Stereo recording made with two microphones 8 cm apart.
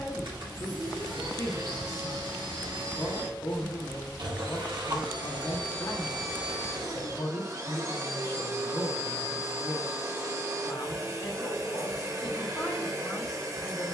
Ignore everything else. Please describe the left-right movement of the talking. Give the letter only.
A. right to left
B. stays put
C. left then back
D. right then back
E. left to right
B.